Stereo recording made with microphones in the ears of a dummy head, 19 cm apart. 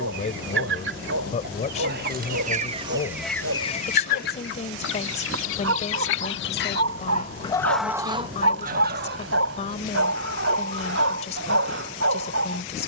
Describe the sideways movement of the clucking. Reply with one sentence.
In this clip you hear the clucking move from right to left and back again.